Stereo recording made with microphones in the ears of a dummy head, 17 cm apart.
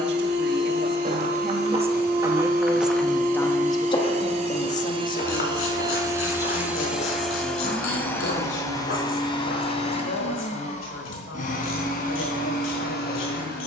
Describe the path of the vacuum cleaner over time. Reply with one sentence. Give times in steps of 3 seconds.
In this clip you hear the vacuum cleaner on the right from 0 s, in the centre from 6 s and on the left from 9 s.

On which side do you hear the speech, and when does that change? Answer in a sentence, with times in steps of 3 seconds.
You can hear the speech on the right from 0 s and on the left from 3 s.